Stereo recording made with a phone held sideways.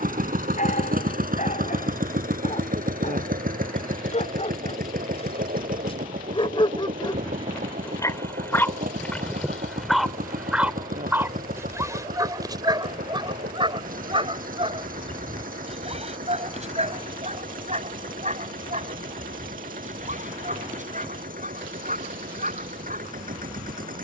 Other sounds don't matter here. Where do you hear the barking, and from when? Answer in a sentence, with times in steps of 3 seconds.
You can hear the barking on the left from 0 s, in the centre from 9 s and on the right from 12 s.